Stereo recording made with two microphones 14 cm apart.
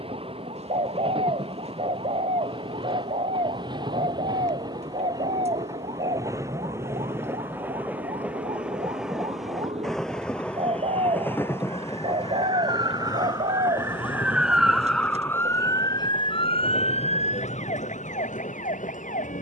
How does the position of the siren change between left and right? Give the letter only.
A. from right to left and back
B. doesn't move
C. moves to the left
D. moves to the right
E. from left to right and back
C.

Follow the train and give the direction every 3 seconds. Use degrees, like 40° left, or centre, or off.
40° right, 30° right, 20° right, 10° left, 30° left, 50° left, 60° left.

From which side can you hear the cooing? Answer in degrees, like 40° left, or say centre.
50° right.